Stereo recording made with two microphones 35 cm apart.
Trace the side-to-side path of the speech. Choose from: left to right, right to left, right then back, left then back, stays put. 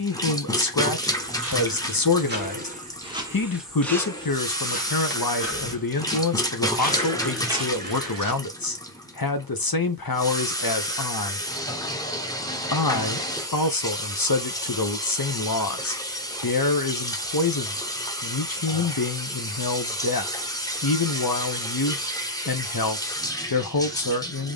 stays put.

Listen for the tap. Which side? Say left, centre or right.
centre.